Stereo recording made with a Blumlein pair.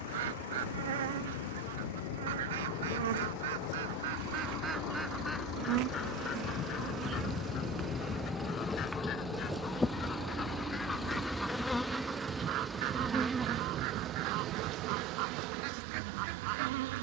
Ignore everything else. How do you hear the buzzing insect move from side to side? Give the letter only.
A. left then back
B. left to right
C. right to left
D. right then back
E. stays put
A.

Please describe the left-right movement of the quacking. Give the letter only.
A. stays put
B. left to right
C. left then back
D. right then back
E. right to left
C.